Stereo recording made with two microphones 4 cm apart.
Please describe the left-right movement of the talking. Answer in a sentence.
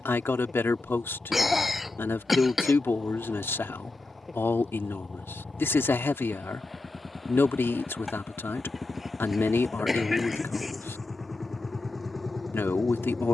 In this clip you hear the talking stay put.